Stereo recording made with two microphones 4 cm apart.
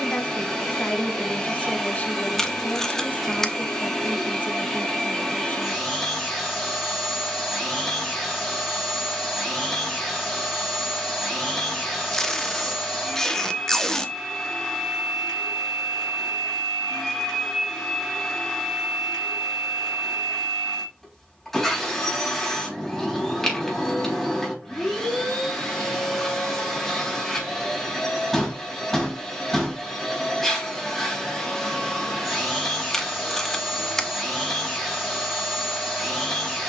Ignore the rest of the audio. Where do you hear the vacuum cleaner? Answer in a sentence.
You can hear the vacuum cleaner in the centre.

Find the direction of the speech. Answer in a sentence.
You can hear the speech on the left.